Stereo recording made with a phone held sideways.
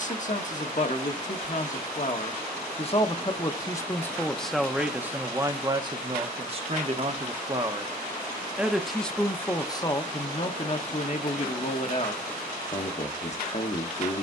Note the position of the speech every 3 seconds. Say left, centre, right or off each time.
left, centre, right, left, left.